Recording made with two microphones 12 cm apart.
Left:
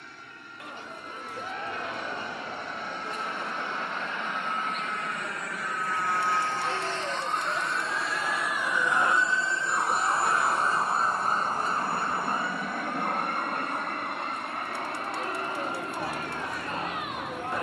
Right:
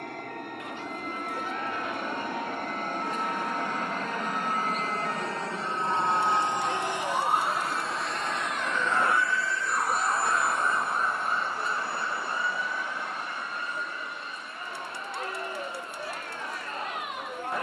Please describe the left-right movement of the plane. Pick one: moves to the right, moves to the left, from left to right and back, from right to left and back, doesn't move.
moves to the left.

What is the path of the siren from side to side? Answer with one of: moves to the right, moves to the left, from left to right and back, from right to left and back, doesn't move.
moves to the left.